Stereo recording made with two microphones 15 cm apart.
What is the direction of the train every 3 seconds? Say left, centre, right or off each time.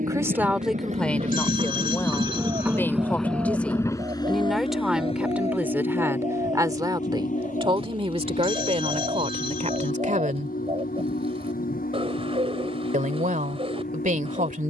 right, left, left, left, left.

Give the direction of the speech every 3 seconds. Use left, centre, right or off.
centre, centre, right, right, right.